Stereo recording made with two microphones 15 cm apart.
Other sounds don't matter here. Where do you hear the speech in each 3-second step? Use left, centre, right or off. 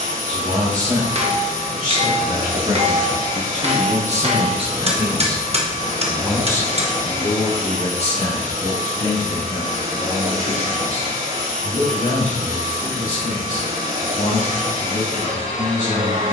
right, right, left, left, left, left.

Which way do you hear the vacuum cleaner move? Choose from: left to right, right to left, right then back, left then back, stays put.
stays put.